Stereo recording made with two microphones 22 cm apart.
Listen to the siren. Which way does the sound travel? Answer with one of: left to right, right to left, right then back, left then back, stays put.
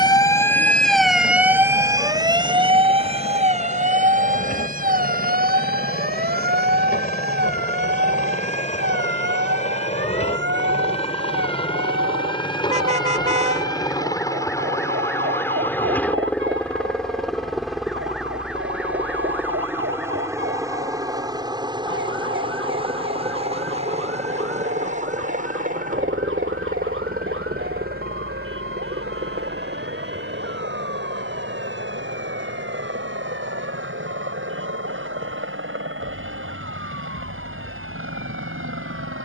left to right.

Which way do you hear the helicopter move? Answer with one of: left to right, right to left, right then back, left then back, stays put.
left to right.